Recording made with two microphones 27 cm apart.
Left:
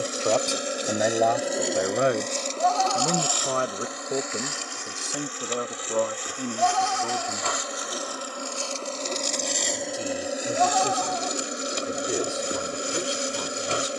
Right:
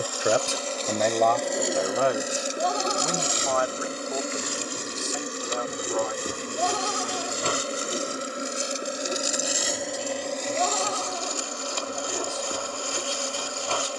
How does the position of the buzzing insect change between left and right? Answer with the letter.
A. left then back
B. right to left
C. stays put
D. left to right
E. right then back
E.